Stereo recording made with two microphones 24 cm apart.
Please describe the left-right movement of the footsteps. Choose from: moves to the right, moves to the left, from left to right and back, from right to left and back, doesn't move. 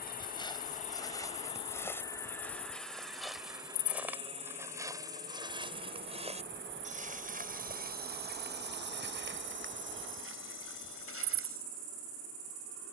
moves to the right.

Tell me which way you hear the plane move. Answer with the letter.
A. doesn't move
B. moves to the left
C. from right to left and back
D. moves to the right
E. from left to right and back
D.